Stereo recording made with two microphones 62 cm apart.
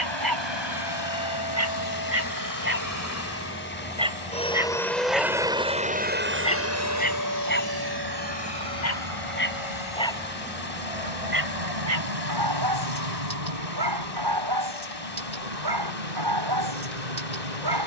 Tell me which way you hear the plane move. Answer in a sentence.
You can hear the plane move from left to right.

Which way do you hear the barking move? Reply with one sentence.
In this clip you hear the barking go left and come back.